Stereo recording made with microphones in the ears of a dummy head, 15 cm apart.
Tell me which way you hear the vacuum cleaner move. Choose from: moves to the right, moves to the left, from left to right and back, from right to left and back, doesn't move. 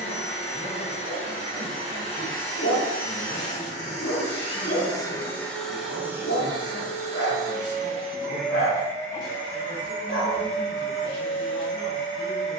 from left to right and back.